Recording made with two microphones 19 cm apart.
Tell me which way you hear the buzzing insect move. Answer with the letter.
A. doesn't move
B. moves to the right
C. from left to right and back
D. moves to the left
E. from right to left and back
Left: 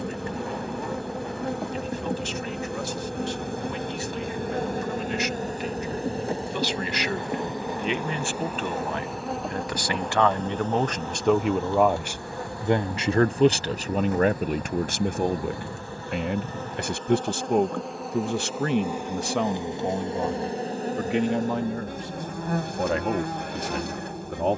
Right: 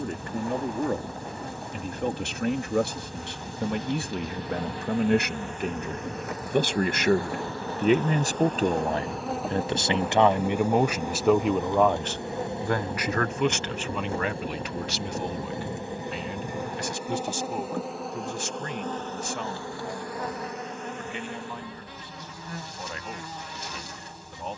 C.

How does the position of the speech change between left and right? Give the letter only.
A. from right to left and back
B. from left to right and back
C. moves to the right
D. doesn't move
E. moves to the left
E.